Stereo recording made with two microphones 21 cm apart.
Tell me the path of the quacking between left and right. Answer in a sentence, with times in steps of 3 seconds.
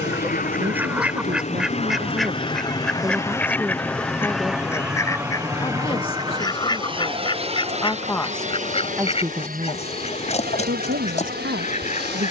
In this clip you hear the quacking in the centre from 0 s and on the left from 6 s.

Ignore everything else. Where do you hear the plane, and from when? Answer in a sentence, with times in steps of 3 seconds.
In this clip you hear the plane on the left from 0 s, in the centre from 3 s and on the right from 6 s.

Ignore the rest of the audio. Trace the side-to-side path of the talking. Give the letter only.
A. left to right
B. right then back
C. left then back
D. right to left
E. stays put
C.